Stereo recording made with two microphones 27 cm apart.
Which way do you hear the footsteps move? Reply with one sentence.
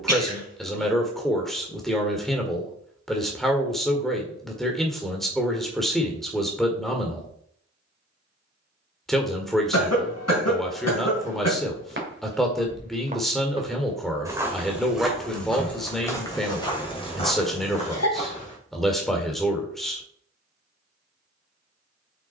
In this clip you hear the footsteps move from right to left.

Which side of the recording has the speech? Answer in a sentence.
In this clip you hear the speech in the centre.